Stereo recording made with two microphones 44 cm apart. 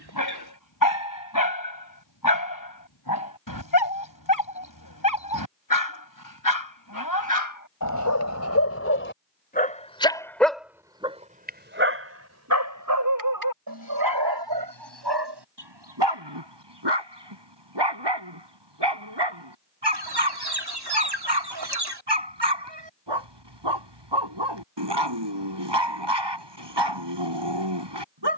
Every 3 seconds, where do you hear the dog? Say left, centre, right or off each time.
left, left, left, centre, right, right, right, right, right, right.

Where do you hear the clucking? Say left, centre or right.
right.